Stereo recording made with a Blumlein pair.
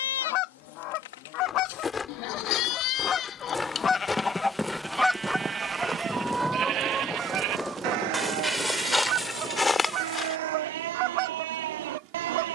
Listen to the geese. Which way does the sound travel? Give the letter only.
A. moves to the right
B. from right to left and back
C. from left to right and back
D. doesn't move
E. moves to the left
A.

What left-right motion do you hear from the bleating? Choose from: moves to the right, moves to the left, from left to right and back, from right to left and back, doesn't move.
moves to the right.